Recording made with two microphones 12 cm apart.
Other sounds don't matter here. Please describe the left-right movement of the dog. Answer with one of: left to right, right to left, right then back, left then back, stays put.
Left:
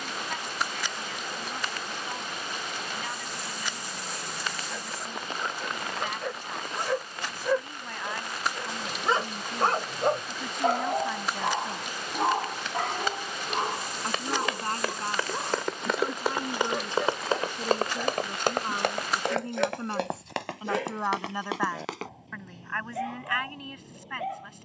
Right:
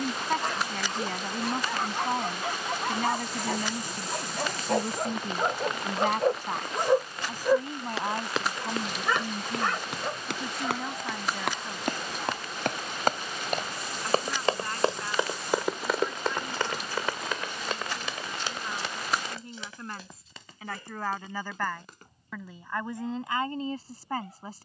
right to left.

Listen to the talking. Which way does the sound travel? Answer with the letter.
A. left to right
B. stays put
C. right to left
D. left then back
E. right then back
D.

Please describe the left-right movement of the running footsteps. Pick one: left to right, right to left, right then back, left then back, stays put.
right to left.